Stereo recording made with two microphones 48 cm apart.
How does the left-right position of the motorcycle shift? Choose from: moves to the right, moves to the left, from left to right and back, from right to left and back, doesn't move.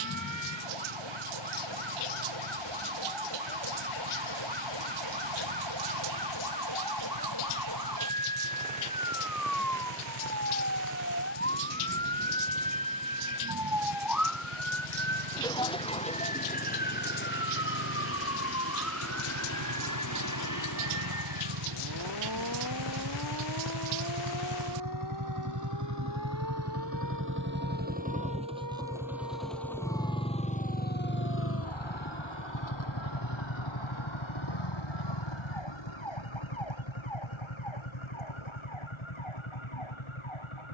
moves to the left.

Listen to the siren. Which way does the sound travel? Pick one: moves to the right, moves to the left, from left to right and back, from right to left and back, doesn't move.
moves to the left.